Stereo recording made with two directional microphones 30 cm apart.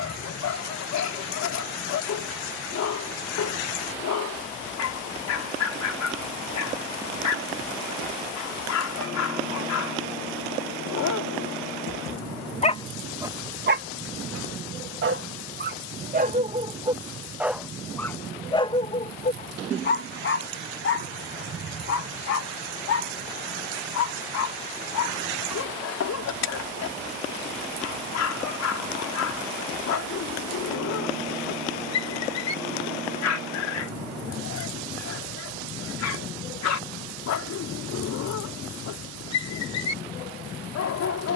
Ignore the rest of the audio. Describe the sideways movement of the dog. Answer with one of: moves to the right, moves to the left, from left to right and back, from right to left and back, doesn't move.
from left to right and back.